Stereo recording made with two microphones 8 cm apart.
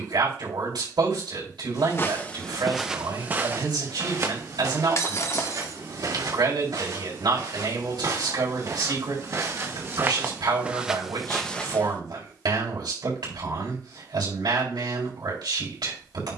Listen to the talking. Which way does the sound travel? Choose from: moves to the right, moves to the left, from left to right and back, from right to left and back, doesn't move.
doesn't move.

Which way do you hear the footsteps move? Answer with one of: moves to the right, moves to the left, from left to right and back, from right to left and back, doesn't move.
from left to right and back.